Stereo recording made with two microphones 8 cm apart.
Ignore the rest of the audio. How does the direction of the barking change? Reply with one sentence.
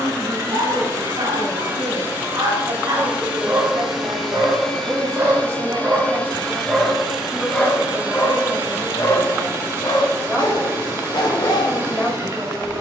You can hear the barking move to the left.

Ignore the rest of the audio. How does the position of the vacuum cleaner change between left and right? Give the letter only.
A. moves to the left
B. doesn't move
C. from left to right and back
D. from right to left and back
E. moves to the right
D.